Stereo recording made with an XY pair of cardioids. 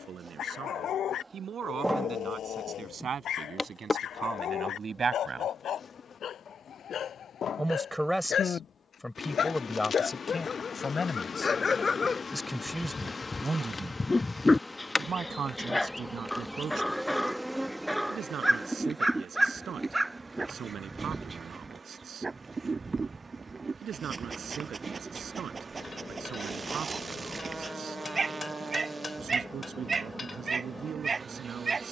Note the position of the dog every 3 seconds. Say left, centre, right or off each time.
left, left, left, left, left, centre, centre, right, right, right, right.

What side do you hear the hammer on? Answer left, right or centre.
left.